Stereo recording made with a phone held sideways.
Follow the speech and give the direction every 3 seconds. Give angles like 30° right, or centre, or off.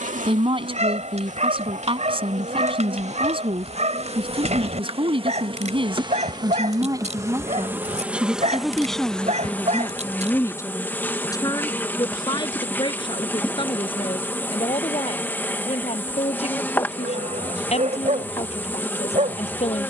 40° right, 40° right, 20° right, 10° left, 30° left, 40° left, 50° left.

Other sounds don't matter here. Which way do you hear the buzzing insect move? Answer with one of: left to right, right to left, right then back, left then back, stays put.
right to left.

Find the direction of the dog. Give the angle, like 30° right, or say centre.
50° right.